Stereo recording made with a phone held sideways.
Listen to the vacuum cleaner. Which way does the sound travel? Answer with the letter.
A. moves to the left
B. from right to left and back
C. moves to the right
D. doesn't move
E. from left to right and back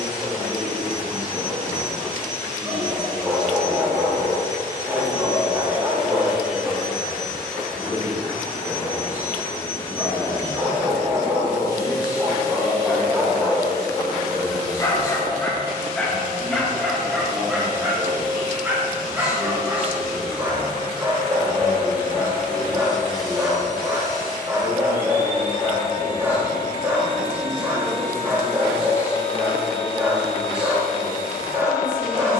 A.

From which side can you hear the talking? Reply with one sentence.
In this clip you hear the talking in the centre.